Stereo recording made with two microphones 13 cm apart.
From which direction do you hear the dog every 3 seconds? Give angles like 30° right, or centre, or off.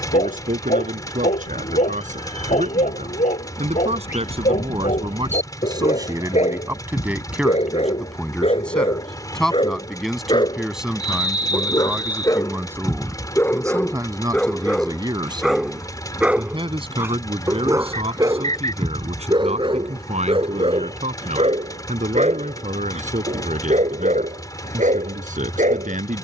60° left, 60° left, 50° left, 30° left, 20° left, 10° right, 40° right, 50° right, 60° right.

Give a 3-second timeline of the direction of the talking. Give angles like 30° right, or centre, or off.
70° right, 40° right, 10° right, centre, 20° right, 40° right, 50° right, 60° right, 70° right.